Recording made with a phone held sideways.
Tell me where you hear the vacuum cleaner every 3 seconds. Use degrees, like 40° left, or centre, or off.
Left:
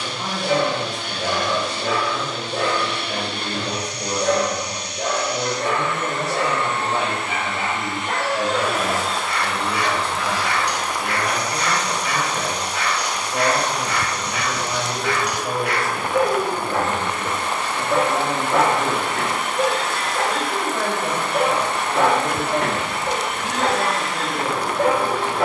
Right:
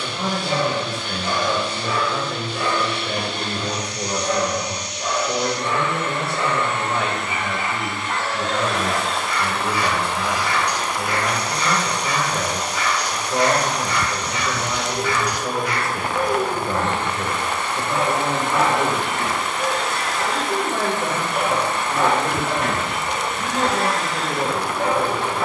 60° left, 50° left, 20° left, 10° right, 30° right, 30° left, 60° left, 60° left, 60° left.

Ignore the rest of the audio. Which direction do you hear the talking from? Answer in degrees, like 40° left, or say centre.
50° right.